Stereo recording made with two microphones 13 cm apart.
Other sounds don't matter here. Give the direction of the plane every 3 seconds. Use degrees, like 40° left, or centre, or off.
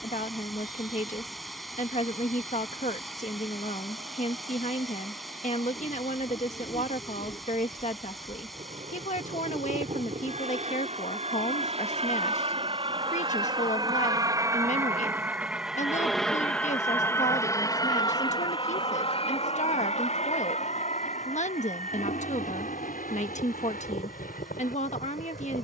70° right, 70° right, 60° right, 60° right, 30° right, 10° left, 40° left, 60° left, 70° left.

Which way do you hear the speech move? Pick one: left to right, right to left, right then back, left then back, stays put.
stays put.